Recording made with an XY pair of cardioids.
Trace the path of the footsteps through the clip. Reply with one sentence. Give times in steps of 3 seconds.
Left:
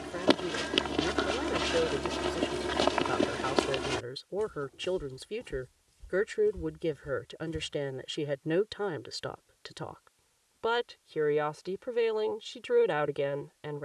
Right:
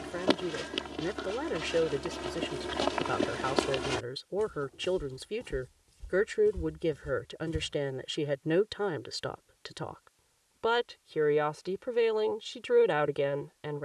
You can hear the footsteps on the left from 0 s, in the centre from 3 s, on the right from 6 s and not at all from 9 s.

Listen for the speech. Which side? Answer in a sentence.
In this clip you hear the speech in the centre.